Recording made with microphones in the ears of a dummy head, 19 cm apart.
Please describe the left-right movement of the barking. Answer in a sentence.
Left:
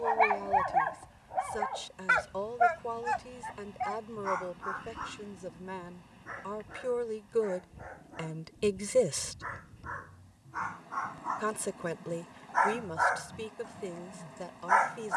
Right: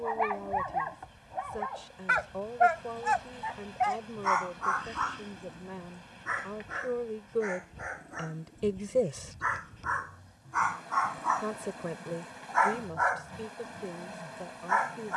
In this clip you hear the barking move from left to right and back again.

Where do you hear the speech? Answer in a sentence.
In this clip you hear the speech on the left.